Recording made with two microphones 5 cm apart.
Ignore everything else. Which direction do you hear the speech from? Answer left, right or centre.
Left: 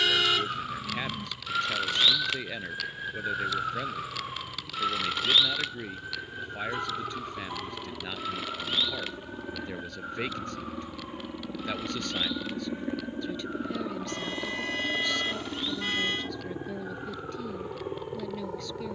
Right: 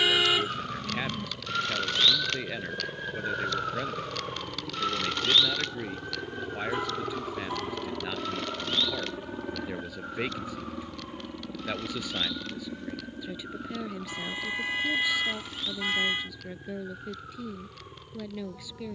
centre.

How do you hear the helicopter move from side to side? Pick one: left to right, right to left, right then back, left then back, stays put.
right to left.